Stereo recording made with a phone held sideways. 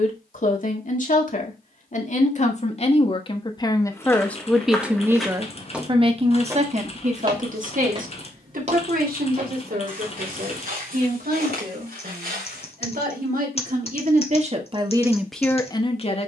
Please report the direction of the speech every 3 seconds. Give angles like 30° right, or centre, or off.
50° left, 10° left, 50° right, 70° right, 60° right, 20° left.